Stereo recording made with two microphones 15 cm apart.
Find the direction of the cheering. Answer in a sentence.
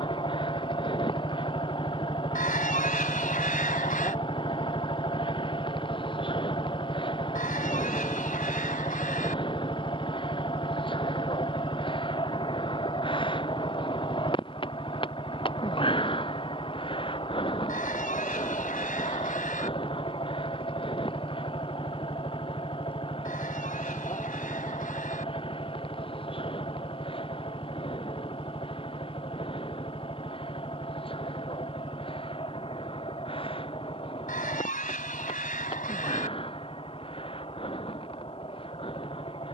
In this clip you hear the cheering on the left.